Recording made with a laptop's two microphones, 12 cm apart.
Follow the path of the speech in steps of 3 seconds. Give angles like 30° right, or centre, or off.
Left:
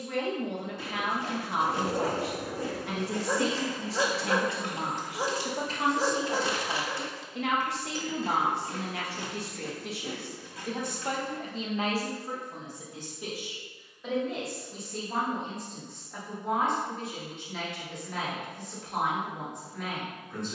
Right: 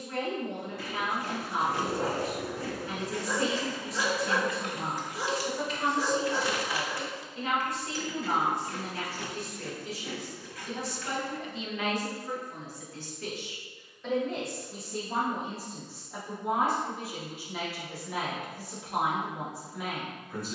80° left, 80° left, 80° left, 60° left, 10° left, 10° right, 10° right.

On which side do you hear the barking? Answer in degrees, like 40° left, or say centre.
40° left.